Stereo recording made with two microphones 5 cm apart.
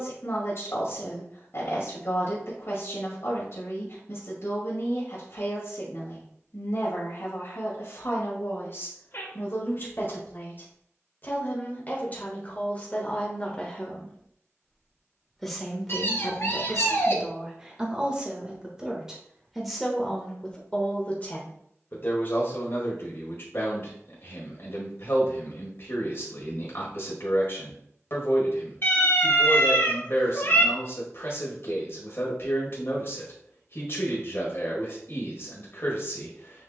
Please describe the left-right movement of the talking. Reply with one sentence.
You can hear the talking go right and come back.